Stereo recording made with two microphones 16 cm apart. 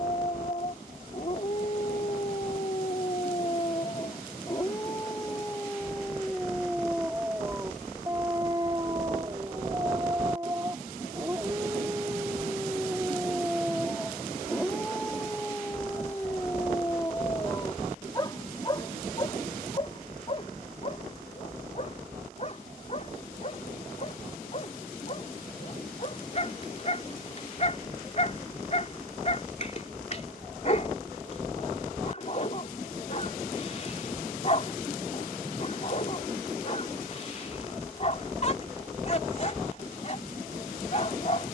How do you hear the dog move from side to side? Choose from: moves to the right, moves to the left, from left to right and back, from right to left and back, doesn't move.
from left to right and back.